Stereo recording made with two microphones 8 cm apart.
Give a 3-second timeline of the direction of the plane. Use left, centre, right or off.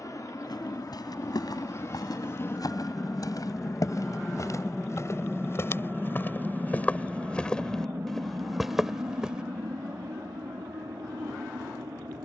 left, centre, right, right.